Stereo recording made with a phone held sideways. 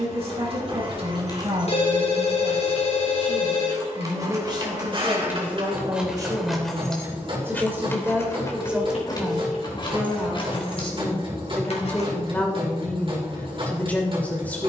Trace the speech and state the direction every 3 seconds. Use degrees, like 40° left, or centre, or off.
40° right, 30° right, 20° right, 10° left, 10° left.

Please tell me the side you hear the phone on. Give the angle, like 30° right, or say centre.
50° left.